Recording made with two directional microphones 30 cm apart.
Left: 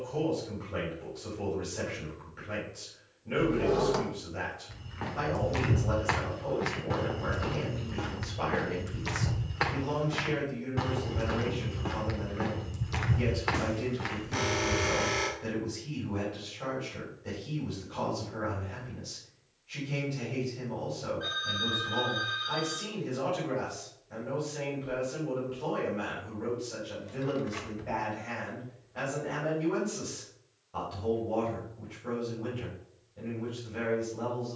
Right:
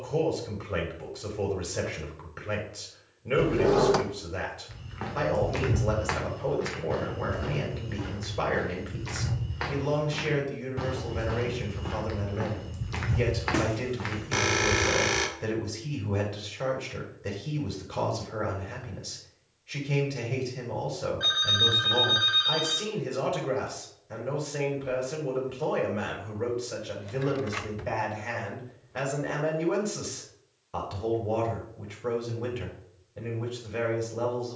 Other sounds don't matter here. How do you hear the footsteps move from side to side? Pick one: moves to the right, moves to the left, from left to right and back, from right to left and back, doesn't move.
from right to left and back.